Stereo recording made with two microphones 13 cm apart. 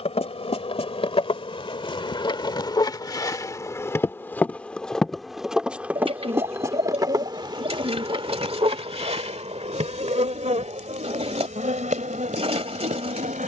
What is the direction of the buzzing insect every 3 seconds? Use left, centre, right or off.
left, centre, right, right, right.